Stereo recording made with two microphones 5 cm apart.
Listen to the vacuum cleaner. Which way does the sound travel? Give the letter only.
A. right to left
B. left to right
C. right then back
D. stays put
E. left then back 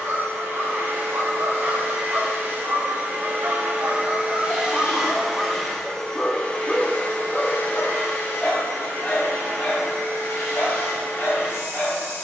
A.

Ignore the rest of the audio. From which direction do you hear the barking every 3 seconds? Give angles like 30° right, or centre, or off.
60° right, 20° right, 20° left, 40° left.